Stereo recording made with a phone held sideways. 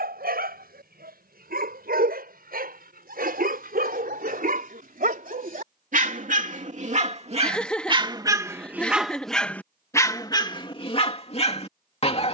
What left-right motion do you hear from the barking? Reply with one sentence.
In this clip you hear the barking move from right to left.